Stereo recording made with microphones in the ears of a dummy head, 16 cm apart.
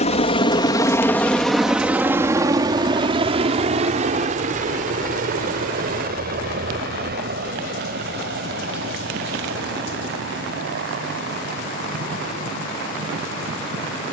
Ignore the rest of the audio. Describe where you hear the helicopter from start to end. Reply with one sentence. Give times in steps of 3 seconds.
You can hear the helicopter in the centre from 0 s and on the right from 3 s.